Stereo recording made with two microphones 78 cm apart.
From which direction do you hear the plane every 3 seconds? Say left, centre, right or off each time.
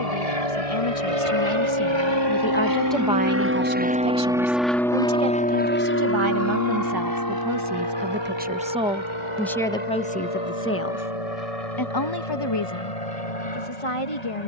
right, centre, left, left, left.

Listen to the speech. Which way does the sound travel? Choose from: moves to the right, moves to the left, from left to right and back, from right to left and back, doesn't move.
from left to right and back.